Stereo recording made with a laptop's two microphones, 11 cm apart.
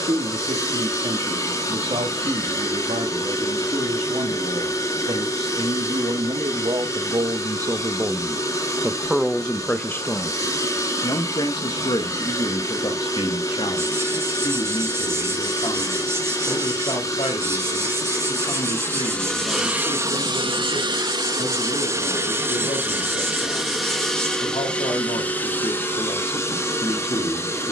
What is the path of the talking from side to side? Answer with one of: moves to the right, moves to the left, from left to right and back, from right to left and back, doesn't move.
moves to the left.